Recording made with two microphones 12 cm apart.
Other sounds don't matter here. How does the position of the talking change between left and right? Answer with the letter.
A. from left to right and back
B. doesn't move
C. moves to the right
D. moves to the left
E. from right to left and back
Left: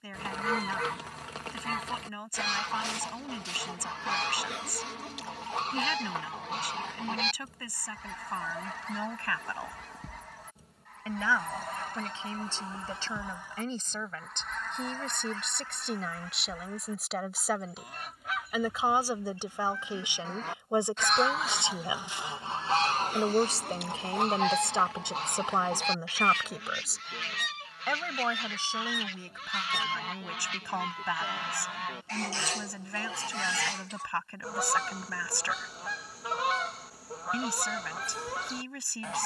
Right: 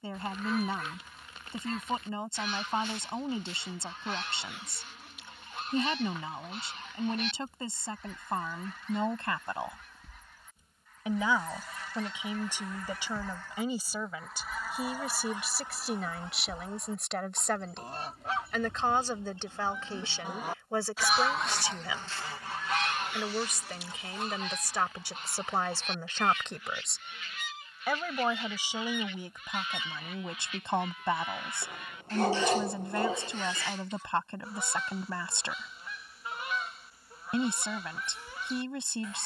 E.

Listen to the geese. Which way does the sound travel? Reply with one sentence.
You can hear the geese move from left to right and back again.